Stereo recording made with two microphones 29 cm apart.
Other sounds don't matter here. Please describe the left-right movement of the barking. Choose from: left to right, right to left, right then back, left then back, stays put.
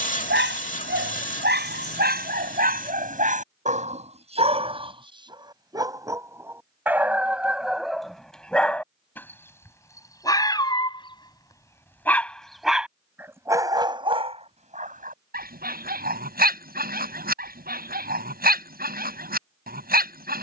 left then back.